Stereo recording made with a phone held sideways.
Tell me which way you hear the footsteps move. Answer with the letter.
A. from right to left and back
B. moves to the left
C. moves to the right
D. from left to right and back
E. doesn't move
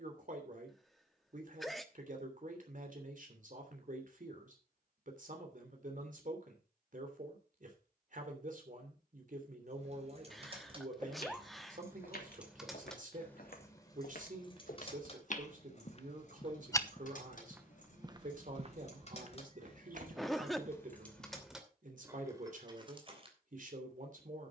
C.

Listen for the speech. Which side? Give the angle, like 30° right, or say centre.
60° right.